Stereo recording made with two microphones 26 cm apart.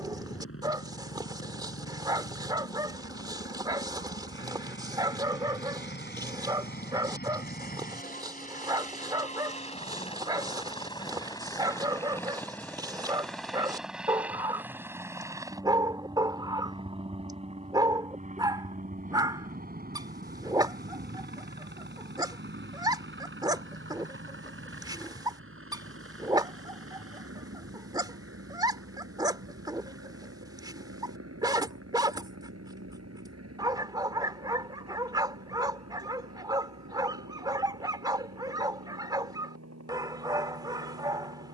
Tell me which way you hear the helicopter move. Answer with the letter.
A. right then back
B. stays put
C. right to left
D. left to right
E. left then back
D.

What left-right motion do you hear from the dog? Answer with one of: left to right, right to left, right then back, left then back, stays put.
stays put.